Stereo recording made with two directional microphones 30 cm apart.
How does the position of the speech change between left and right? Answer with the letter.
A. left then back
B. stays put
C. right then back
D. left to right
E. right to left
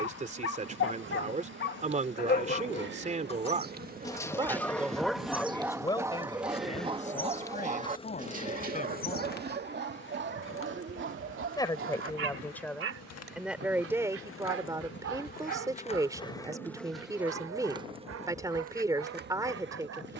A.